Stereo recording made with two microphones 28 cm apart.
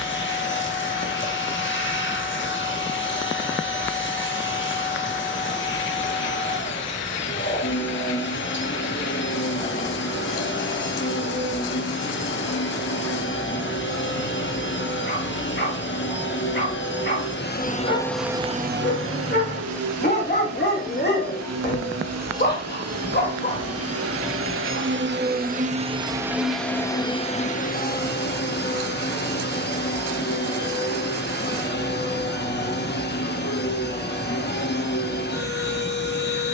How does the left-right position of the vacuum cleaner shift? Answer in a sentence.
You can hear the vacuum cleaner move from left to right and back again.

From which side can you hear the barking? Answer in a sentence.
In this clip you hear the barking on the left.